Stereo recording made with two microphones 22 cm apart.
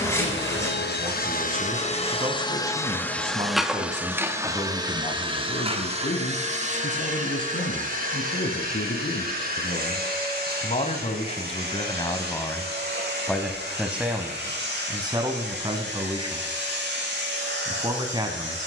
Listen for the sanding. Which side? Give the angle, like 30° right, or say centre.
10° left.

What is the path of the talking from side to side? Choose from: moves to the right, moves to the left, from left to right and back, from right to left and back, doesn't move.
from right to left and back.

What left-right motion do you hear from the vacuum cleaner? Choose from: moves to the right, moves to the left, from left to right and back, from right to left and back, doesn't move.
moves to the right.